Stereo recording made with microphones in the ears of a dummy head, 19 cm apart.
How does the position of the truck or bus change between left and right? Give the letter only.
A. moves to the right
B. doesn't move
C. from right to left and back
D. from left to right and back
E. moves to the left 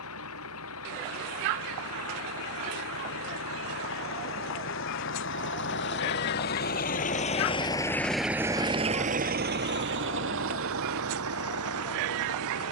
A.